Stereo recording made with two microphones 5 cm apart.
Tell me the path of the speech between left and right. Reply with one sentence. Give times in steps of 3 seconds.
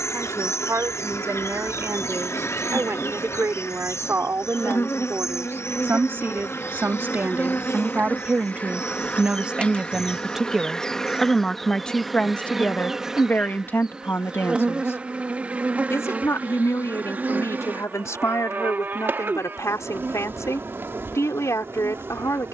You can hear the speech on the right from 0 s, in the centre from 9 s and on the left from 12 s.